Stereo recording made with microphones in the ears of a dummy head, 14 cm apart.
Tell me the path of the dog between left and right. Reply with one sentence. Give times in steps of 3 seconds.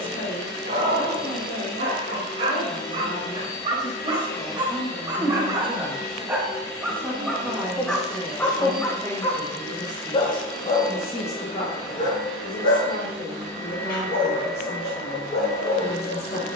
You can hear the dog on the right from 0 s, in the centre from 6 s and on the left from 9 s.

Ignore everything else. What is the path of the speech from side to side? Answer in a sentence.
You can hear the speech move from left to right and back again.